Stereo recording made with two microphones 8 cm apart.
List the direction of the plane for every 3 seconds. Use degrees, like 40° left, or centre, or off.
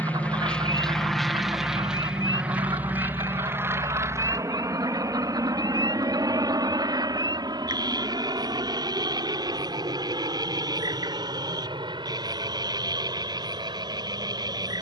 centre, 40° right, 50° right, 60° right, 70° right.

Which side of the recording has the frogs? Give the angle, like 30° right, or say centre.
60° right.